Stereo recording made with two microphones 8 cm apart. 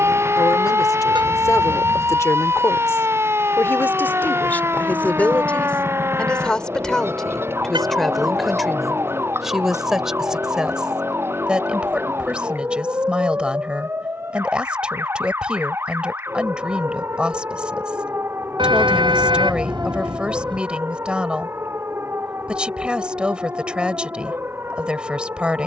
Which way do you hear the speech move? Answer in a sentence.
You can hear the speech move to the right.